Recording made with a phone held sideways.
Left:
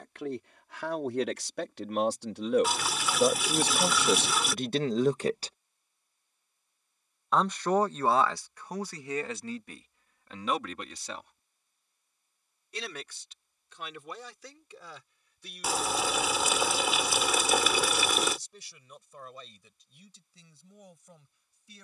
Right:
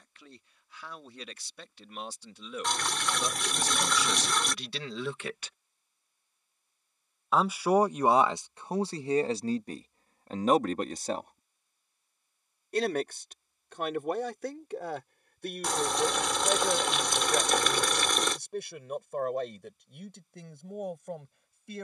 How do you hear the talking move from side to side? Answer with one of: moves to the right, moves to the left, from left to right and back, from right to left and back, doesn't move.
moves to the right.